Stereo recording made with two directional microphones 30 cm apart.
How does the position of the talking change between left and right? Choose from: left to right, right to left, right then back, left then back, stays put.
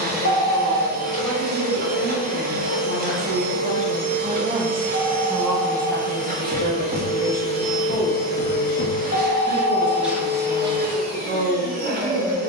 left then back.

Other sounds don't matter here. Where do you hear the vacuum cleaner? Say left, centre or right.
right.